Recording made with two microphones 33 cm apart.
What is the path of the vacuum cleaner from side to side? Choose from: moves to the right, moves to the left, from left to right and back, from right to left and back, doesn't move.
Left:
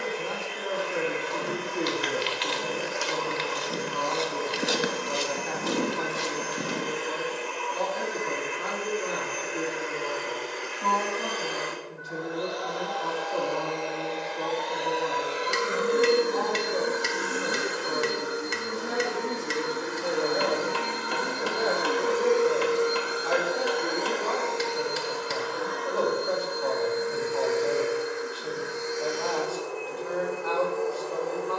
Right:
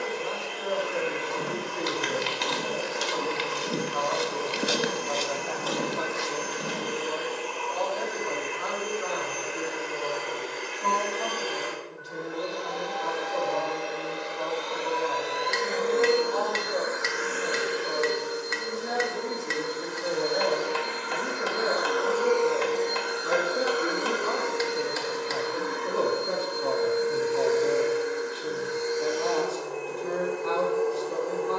from right to left and back.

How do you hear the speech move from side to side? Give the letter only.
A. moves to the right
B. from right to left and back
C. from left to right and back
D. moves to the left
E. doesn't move
A.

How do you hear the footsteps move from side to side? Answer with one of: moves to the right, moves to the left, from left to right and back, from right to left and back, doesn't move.
moves to the left.